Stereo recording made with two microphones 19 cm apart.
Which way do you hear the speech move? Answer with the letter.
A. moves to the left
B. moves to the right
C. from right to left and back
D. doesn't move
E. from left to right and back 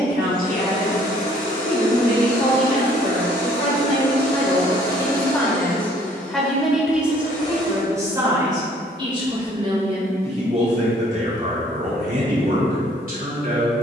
B.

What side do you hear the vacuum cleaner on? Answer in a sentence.
In this clip you hear the vacuum cleaner on the left.